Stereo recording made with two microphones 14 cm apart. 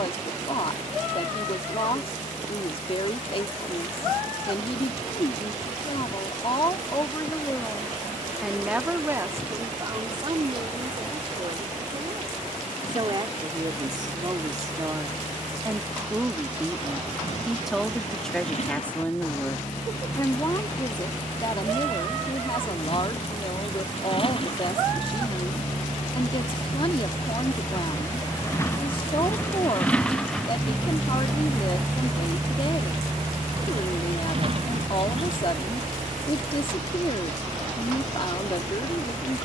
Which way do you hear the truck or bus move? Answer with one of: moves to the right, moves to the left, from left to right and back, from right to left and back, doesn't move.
moves to the right.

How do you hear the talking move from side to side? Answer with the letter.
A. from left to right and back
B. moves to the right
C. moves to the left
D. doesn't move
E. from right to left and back
A.